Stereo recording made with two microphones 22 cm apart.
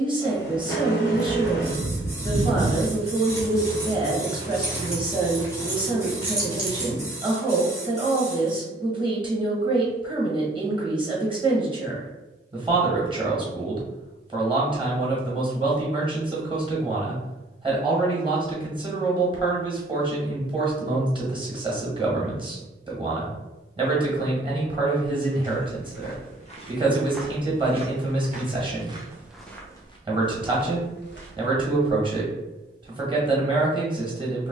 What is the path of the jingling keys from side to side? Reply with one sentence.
In this clip you hear the jingling keys go left and come back.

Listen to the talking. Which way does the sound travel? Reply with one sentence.
You can hear the talking stay in one place.